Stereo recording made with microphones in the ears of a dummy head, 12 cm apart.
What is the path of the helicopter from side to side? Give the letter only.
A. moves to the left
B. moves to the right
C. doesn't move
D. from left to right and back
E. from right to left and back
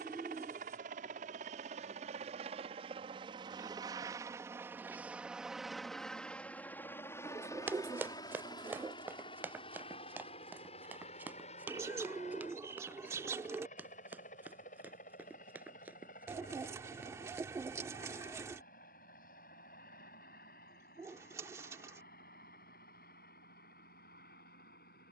A.